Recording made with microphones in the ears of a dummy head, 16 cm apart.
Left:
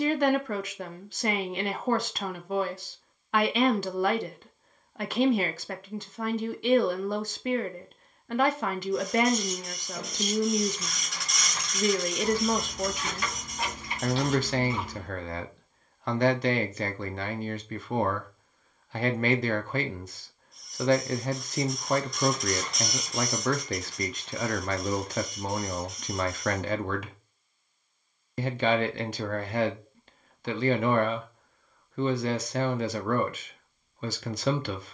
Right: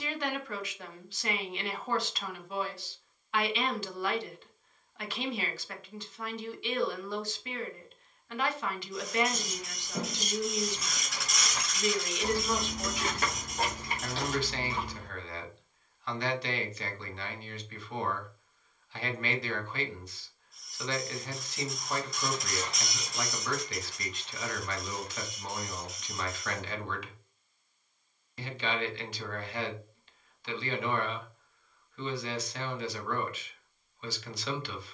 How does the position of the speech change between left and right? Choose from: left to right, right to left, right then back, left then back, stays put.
stays put.